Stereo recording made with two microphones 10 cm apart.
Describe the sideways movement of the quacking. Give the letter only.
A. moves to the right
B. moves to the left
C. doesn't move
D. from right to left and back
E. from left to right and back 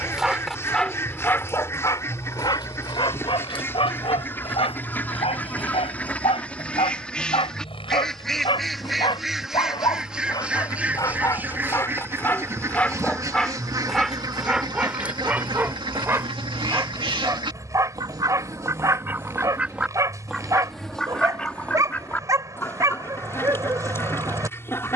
E.